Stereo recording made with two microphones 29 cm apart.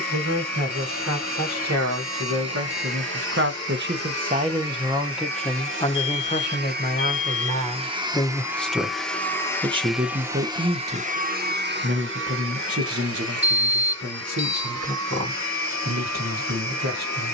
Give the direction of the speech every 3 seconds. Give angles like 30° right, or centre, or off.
70° right, 20° right, 20° left, 30° right, 60° right, 70° right.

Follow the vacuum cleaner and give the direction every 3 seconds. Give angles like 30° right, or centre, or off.
70° right, 60° right, 20° right, 20° right, 60° right, 70° right.